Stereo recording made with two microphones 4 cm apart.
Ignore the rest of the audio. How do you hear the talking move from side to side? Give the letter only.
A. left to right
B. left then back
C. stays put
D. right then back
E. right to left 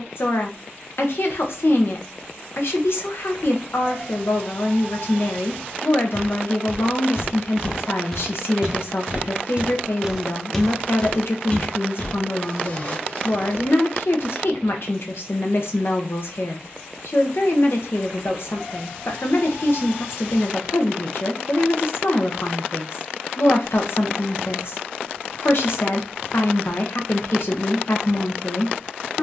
C.